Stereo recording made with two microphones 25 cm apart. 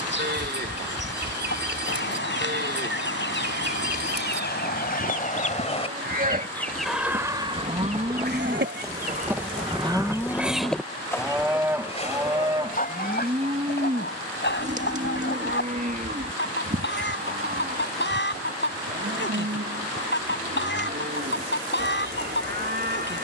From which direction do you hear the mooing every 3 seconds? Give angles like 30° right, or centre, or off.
40° right, 40° right, 30° right, centre, 20° right, 30° right, 40° right, 40° right.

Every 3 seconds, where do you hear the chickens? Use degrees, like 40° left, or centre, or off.
50° left, 40° left, 20° right, 10° right, 40° left, 50° left, 50° left, 50° left.